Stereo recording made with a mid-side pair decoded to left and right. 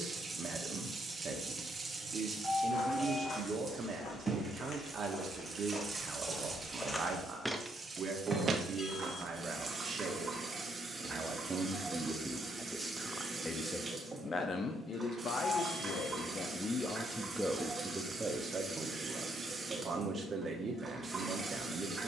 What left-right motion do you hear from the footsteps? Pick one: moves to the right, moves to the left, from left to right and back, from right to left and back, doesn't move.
moves to the right.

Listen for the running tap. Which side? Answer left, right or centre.
right.